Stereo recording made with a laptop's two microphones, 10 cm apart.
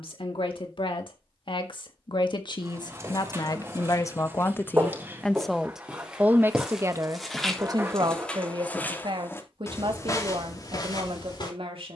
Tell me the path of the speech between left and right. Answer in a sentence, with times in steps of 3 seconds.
You can hear the speech on the left from 0 s and on the right from 6 s.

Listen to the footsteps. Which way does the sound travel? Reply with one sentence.
In this clip you hear the footsteps move to the left.